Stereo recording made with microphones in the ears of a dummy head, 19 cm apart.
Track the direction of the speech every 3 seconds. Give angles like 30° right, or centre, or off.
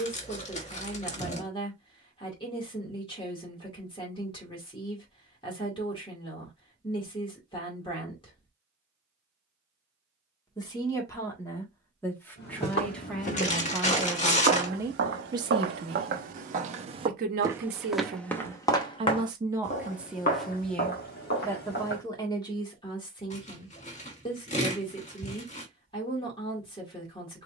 30° left, 30° left, 30° left, 20° left, centre, 40° right, 20° right, 20° left, 30° left.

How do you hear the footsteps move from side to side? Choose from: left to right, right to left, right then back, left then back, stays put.
right then back.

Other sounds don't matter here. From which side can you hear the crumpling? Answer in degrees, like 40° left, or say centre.
40° left.